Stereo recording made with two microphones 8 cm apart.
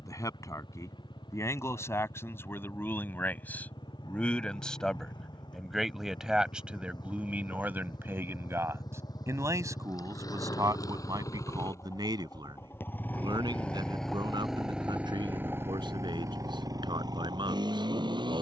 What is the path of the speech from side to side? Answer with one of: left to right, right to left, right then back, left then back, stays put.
left to right.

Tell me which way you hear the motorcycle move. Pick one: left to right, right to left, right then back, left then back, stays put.
left to right.